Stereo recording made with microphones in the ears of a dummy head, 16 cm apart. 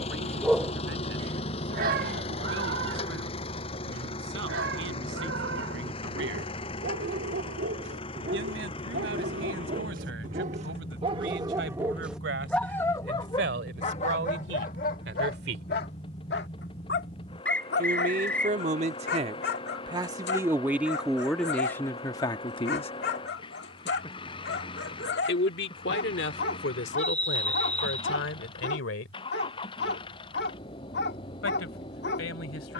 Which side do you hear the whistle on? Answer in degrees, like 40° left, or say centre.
10° left.